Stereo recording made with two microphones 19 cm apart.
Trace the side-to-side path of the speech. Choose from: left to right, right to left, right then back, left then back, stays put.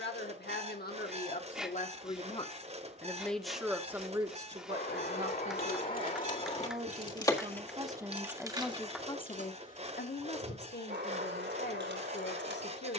right then back.